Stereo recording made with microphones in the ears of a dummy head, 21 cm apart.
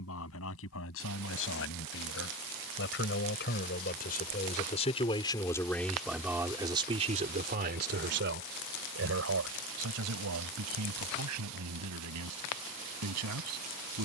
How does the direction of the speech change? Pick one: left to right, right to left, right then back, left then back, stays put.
left to right.